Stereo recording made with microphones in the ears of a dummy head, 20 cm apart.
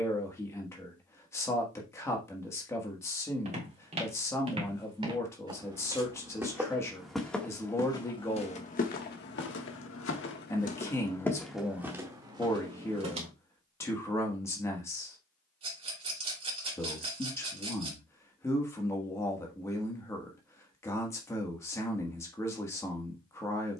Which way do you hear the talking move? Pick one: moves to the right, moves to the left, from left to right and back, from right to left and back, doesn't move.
doesn't move.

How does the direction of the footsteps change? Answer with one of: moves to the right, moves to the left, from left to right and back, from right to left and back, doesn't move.
from right to left and back.